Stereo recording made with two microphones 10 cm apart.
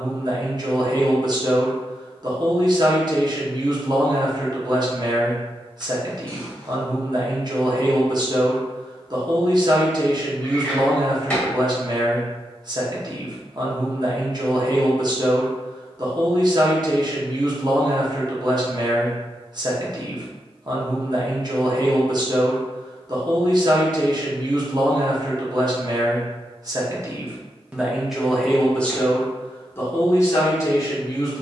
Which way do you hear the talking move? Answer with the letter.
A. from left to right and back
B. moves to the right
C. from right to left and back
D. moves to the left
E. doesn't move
D.